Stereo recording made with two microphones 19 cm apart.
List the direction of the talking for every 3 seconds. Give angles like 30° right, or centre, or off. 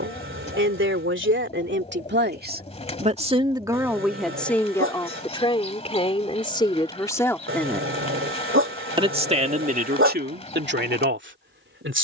70° right, centre, 20° left, 50° right.